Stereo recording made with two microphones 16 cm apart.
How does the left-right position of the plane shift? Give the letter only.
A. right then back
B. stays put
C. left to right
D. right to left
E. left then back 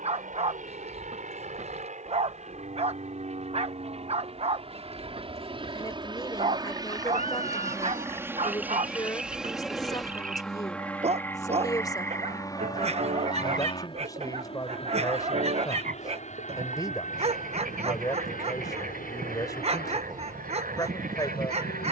D.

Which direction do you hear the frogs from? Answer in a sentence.
You can hear the frogs on the right.